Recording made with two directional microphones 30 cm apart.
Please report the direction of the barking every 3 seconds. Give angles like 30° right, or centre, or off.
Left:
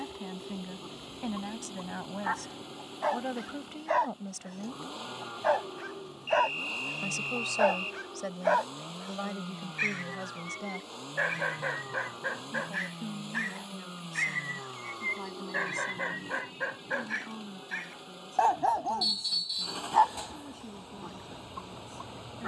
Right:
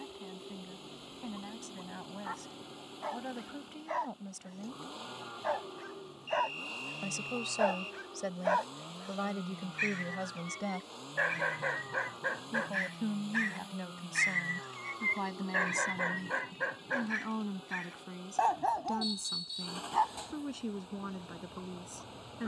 70° left, 50° left, 40° left, 20° left, centre, 10° left, 40° left, 60° left.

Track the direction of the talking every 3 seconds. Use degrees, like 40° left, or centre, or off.
60° left, 40° left, 10° left, 10° right, 30° right, 40° right, 50° right, 60° right.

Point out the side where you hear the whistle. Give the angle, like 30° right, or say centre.
60° left.